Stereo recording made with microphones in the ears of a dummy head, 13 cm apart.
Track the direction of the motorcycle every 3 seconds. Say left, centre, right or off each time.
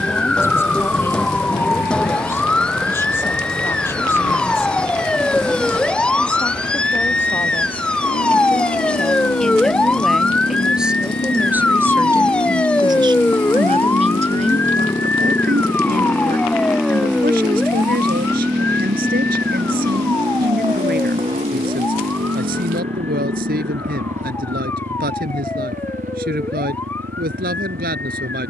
left, left, left, left, left, centre, right, right, right, right.